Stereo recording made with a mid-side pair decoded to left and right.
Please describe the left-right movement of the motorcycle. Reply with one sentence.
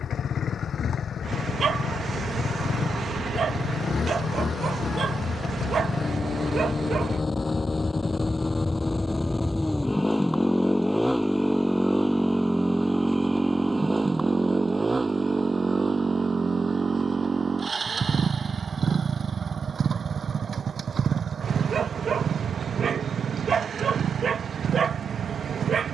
In this clip you hear the motorcycle move from left to right.